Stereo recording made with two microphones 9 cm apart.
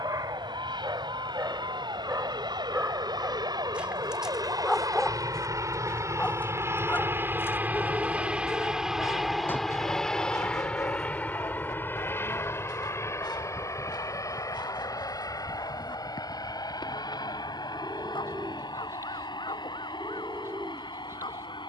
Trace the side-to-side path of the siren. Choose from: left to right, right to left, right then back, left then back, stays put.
right to left.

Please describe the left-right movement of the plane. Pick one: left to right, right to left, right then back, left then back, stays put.
right to left.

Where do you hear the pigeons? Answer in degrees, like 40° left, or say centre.
30° right.